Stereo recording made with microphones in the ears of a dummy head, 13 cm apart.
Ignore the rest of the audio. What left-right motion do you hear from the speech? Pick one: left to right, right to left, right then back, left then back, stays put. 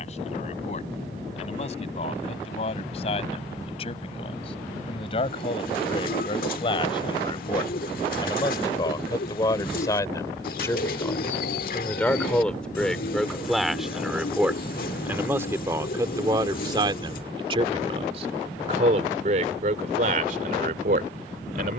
left to right.